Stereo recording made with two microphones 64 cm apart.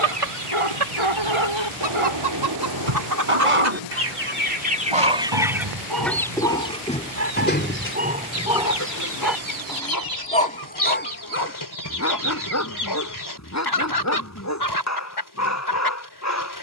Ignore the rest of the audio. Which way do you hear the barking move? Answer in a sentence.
In this clip you hear the barking travel towards the left.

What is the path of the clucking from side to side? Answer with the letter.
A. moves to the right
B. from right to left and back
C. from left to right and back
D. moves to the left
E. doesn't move
D.